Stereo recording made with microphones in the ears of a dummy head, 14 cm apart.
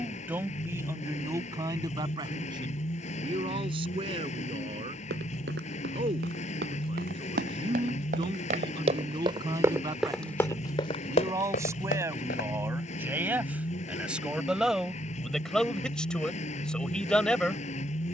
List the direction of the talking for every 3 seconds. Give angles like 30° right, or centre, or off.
20° right, 30° right, 30° right, 20° right, 10° right, 10° left.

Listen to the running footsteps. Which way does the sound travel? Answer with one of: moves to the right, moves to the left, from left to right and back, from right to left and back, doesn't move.
moves to the left.